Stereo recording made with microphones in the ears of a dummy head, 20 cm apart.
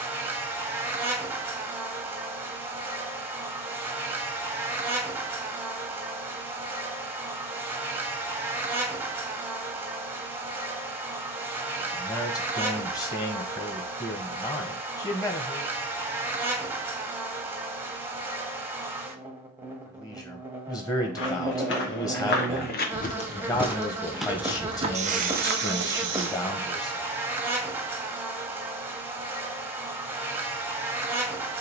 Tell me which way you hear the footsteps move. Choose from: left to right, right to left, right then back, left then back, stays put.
left to right.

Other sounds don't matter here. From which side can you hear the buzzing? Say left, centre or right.
centre.